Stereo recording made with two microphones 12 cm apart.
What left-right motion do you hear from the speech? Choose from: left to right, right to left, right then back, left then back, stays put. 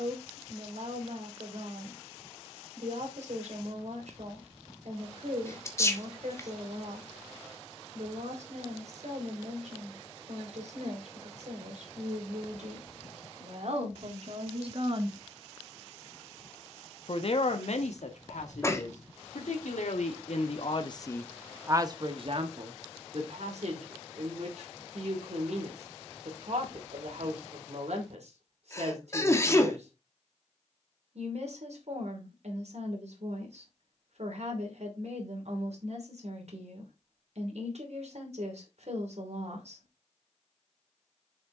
left then back.